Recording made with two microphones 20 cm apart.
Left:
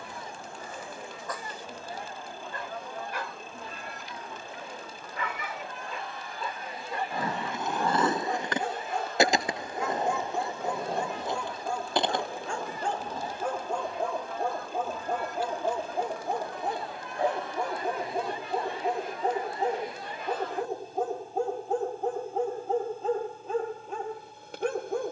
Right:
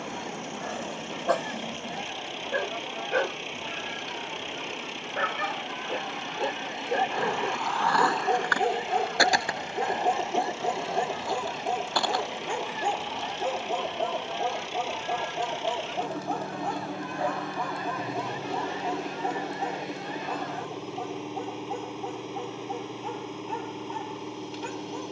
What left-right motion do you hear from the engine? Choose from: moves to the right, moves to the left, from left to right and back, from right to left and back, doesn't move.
doesn't move.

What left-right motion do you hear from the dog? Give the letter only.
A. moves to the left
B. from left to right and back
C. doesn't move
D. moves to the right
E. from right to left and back
A.